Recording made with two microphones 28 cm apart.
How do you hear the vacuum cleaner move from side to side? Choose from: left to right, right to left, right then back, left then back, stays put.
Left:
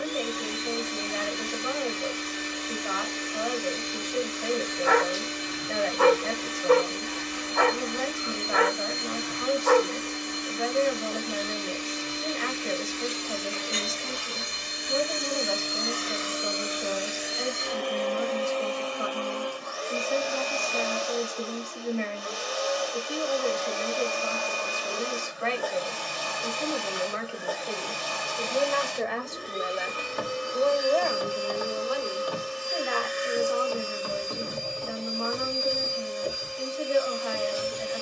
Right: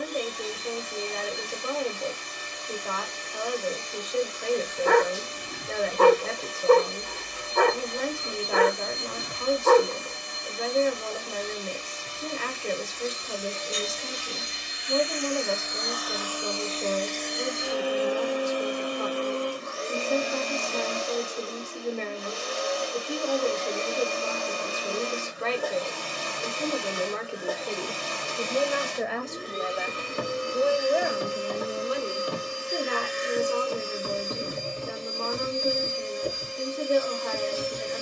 left to right.